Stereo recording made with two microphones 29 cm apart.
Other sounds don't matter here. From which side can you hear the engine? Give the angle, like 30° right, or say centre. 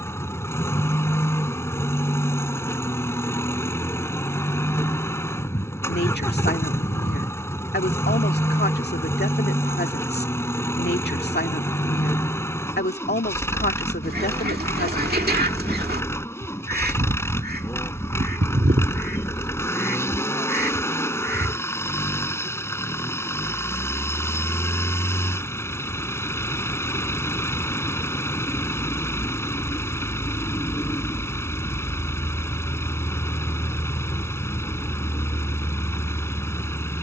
10° left.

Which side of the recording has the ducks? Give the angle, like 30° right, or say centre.
30° right.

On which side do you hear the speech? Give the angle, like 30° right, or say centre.
40° left.